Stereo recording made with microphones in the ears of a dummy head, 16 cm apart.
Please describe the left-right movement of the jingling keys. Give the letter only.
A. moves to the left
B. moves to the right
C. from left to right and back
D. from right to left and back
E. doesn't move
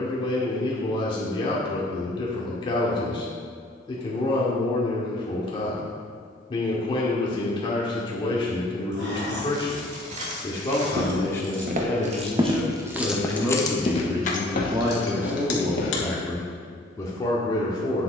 A.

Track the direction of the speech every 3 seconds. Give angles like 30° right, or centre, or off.
30° left, 30° left, 30° left, 20° left, 10° right, 10° left.